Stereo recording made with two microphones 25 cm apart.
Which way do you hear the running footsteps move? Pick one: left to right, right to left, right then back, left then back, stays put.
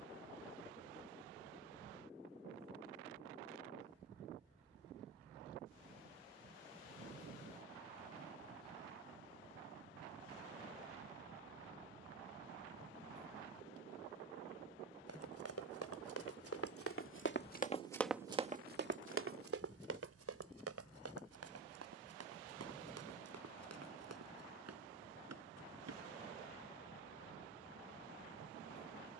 left to right.